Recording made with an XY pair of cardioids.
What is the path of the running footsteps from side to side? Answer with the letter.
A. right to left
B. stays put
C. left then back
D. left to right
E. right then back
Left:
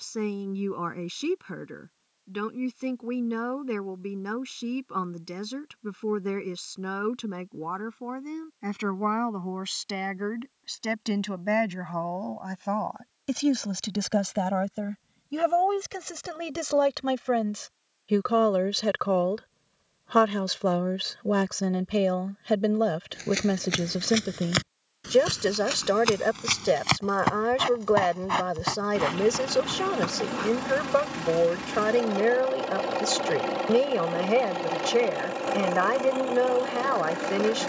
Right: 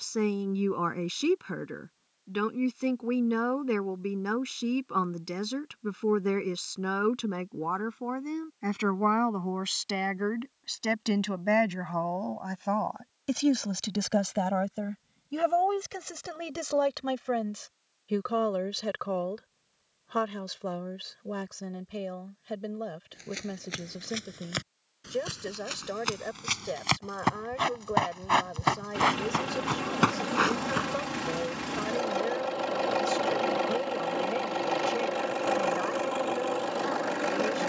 D.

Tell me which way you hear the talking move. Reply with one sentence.
In this clip you hear the talking travel towards the left.